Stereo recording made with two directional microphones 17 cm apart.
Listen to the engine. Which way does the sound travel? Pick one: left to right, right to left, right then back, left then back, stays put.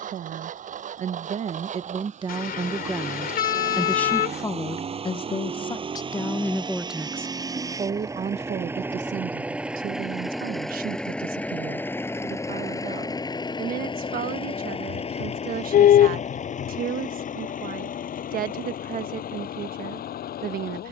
right to left.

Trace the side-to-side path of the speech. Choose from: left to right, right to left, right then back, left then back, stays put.
left then back.